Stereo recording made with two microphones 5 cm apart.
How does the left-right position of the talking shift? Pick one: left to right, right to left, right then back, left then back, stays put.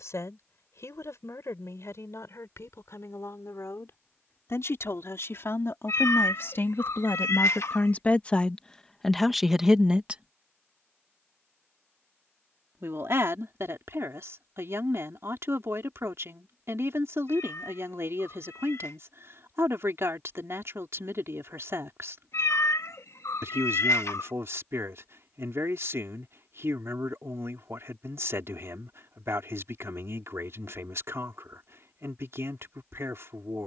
left to right.